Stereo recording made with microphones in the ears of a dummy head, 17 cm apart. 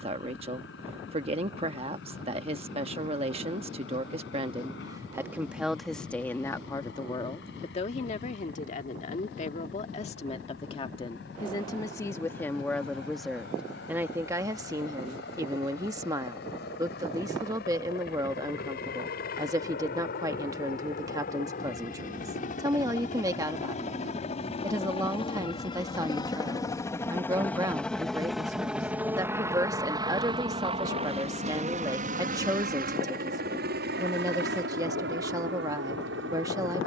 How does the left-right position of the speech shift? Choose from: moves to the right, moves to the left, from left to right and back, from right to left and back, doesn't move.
from right to left and back.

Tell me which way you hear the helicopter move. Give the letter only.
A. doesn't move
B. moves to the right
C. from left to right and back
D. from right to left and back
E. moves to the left
B.